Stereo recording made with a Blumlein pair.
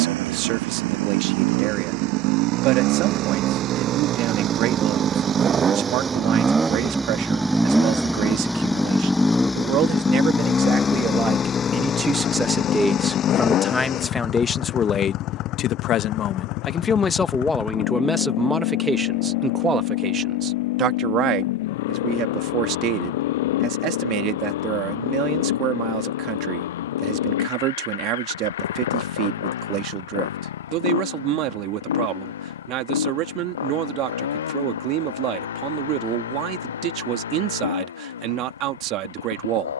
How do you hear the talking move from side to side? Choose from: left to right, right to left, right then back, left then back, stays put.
left then back.